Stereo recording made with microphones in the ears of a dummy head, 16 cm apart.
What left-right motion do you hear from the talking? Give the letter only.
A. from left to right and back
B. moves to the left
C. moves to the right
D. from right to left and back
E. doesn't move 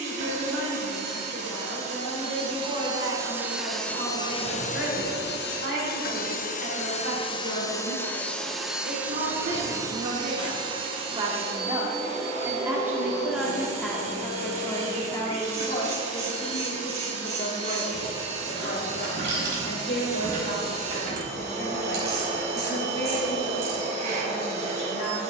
B.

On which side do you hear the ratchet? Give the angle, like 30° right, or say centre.
40° right.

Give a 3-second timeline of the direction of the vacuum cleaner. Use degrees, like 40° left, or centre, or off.
40° right, 30° left, 20° left, 30° right, 40° right, 40° right, 40° right, 40° right, 40° right.